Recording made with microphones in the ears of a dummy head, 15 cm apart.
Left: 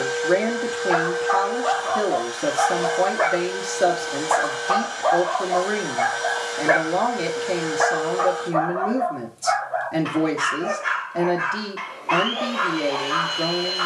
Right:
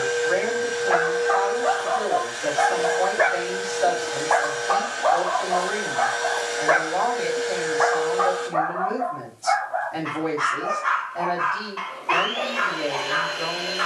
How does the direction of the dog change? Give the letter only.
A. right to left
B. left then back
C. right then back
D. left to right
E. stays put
B.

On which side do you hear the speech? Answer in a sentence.
In this clip you hear the speech on the left.